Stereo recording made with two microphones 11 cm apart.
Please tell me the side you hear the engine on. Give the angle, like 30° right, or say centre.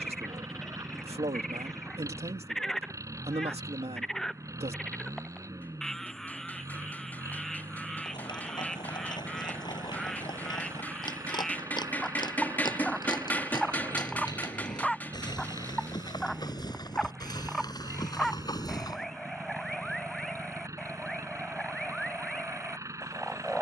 30° right.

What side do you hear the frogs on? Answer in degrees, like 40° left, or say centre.
centre.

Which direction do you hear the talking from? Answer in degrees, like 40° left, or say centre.
70° right.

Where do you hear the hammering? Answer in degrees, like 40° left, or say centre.
20° left.